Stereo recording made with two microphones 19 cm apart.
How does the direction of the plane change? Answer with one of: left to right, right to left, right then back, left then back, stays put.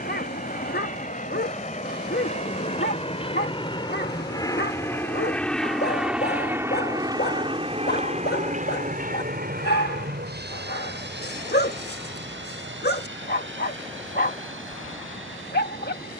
left to right.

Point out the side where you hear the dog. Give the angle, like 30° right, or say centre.
60° left.